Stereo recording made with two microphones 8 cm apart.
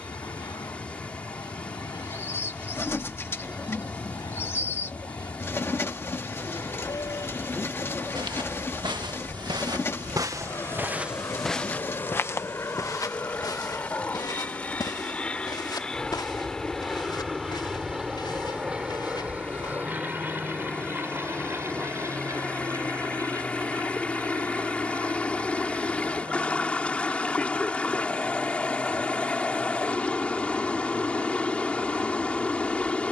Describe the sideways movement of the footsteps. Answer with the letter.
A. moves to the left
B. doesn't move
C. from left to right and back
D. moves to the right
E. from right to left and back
A.